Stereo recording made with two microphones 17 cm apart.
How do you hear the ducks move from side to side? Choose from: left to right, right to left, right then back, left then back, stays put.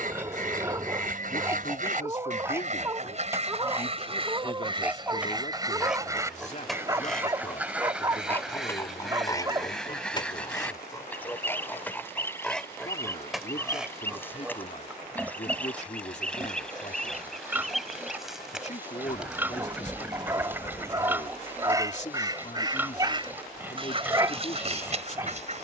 left then back.